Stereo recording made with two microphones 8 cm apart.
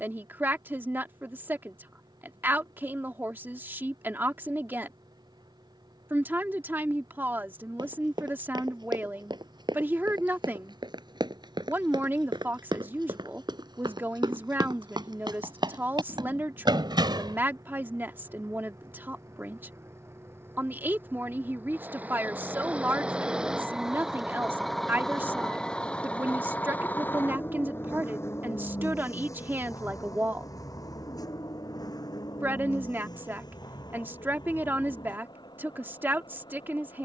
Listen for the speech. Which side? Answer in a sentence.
In this clip you hear the speech on the right.